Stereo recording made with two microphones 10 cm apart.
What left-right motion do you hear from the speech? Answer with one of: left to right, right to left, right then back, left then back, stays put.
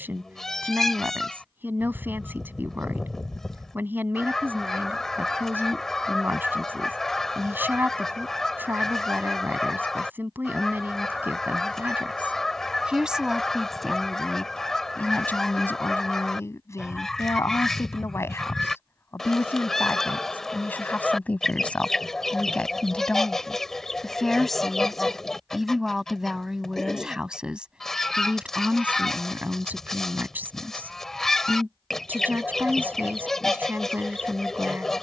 left then back.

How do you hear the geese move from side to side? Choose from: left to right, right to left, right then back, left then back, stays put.
stays put.